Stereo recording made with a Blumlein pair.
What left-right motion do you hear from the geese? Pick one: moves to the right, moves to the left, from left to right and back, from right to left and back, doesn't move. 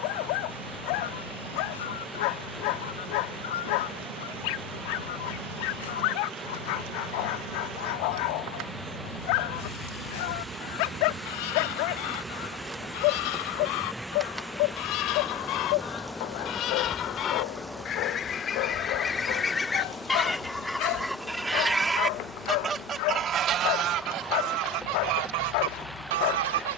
moves to the right.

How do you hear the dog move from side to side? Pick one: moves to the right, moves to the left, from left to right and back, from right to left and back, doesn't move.
doesn't move.